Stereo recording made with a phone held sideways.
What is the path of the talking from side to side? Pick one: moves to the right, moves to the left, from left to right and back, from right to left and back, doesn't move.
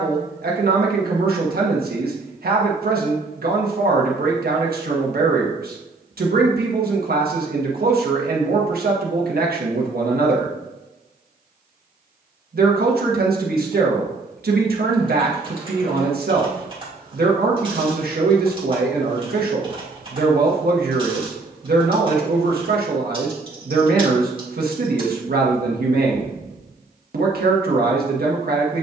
doesn't move.